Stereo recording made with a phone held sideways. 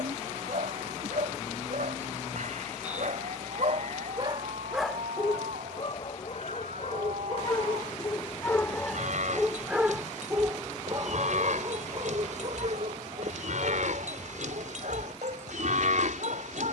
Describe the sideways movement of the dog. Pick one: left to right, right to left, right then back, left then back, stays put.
left then back.